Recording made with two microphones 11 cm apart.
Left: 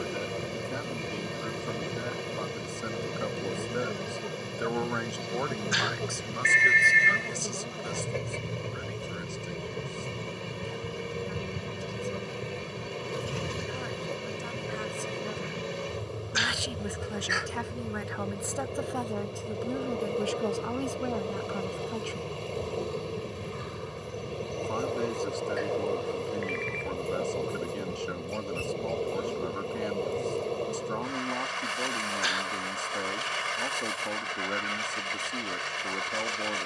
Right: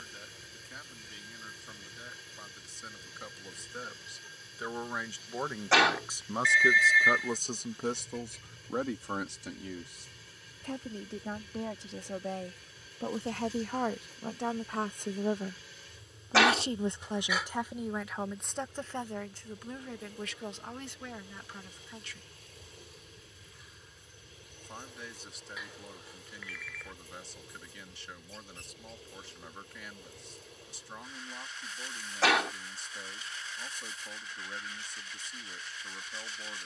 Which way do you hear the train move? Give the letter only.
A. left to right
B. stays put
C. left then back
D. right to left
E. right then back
B.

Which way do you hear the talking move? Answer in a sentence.
You can hear the talking go right and come back.